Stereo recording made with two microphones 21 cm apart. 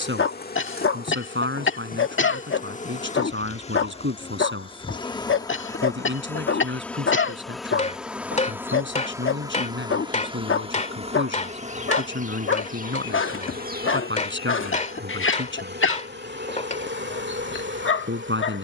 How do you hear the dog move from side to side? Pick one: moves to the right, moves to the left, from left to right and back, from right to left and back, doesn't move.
doesn't move.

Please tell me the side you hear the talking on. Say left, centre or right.
right.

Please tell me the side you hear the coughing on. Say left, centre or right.
left.